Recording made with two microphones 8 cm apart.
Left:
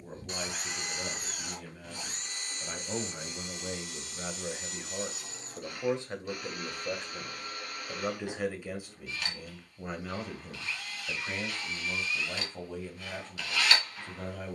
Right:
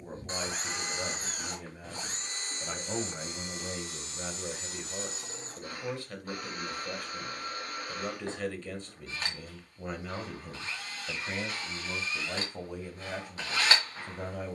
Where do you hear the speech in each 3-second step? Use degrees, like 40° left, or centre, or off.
10° right, 10° left, 20° left, centre, 10° right.